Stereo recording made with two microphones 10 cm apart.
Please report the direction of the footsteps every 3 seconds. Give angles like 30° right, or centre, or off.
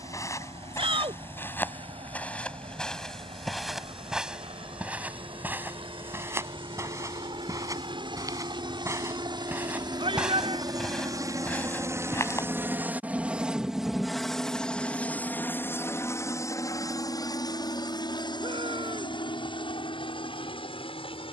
20° left, 10° right, 30° right, centre, 30° left, off, off.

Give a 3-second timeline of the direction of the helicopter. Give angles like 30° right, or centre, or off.
70° right, 70° right, 60° right, 40° right, 10° right, 30° left, 50° left.